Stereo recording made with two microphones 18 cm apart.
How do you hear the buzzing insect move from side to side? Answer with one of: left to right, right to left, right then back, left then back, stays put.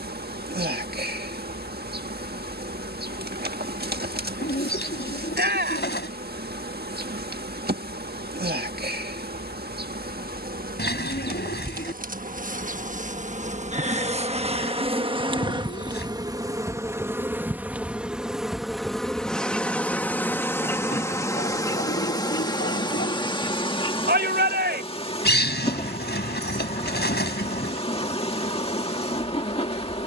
right to left.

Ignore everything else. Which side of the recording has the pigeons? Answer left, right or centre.
left.